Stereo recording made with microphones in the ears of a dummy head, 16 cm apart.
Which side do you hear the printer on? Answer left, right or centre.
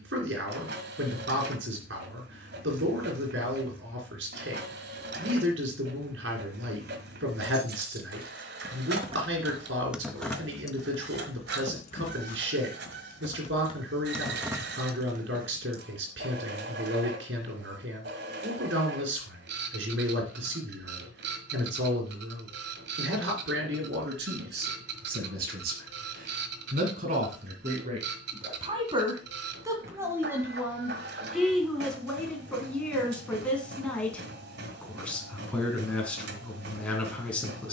right.